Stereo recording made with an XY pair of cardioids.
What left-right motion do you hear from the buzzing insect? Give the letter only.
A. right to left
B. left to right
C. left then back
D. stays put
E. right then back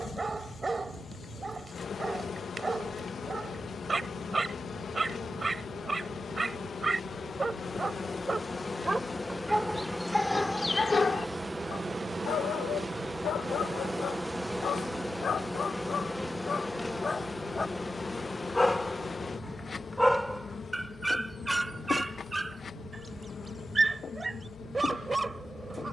E.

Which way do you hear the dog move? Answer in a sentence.
You can hear the dog go left and come back.